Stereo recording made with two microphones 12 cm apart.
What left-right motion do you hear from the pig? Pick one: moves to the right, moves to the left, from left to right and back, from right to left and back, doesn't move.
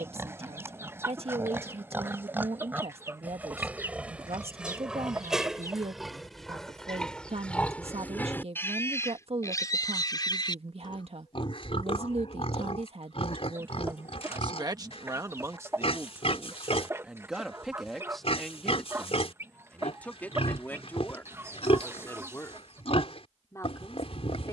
moves to the left.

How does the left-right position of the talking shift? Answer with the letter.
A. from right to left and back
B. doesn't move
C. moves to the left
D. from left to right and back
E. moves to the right
C.